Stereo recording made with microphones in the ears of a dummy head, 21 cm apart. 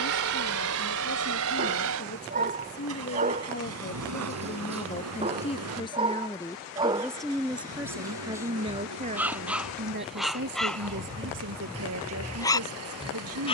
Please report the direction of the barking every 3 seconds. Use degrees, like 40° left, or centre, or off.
30° right, 30° right, 20° right, centre, 20° left.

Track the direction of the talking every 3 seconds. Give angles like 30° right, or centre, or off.
50° left, 30° left, 10° right, 50° right, 70° right.